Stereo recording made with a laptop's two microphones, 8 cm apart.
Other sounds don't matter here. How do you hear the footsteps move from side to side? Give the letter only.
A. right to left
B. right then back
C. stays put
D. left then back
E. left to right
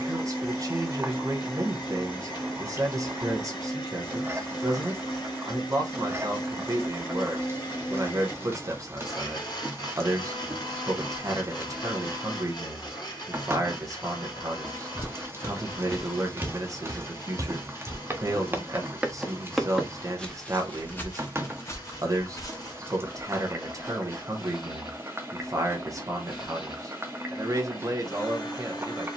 B.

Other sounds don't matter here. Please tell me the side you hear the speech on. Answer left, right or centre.
right.